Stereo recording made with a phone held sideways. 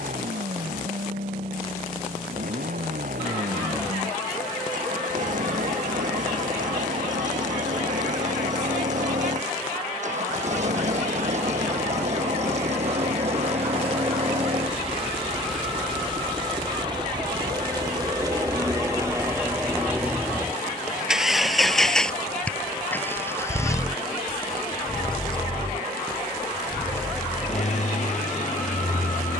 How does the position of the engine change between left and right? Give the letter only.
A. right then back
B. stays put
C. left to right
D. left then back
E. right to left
E.